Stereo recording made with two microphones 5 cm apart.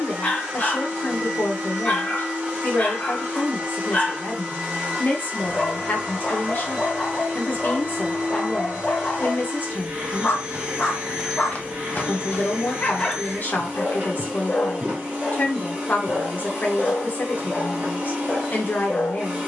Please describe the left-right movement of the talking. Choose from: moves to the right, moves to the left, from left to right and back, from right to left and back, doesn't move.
doesn't move.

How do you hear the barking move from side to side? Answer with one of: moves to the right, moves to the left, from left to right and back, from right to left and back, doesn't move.
doesn't move.